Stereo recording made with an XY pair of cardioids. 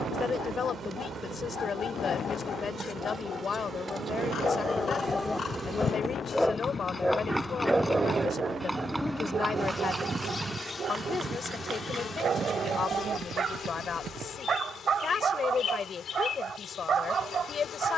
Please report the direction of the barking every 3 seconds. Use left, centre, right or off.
left, left, centre, right, right, right.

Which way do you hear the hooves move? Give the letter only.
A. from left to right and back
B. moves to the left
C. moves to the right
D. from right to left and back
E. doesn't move
C.